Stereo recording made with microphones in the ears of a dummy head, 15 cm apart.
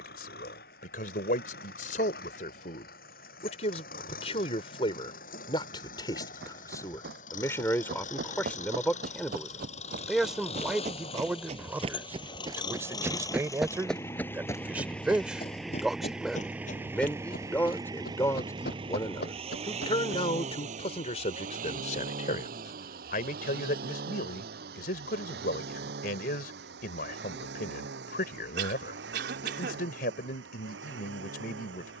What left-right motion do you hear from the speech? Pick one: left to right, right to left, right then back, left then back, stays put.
right then back.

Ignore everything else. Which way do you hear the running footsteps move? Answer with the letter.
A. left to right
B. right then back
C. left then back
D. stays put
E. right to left
E.